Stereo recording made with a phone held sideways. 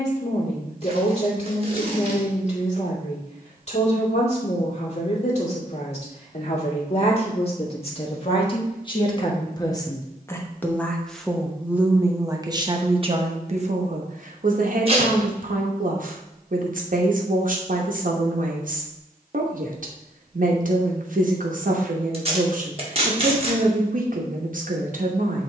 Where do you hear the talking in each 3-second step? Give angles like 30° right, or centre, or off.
50° left, 50° left, 40° left, 10° left, 40° right, 60° right, 60° right, 60° right, 60° right.